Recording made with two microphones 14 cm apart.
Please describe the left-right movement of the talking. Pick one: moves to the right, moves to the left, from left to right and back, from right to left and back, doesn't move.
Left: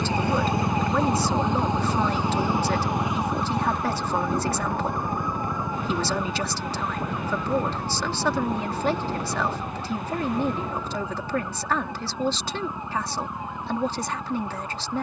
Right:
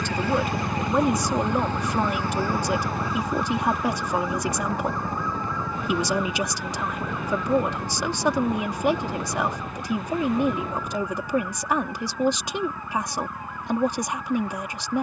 doesn't move.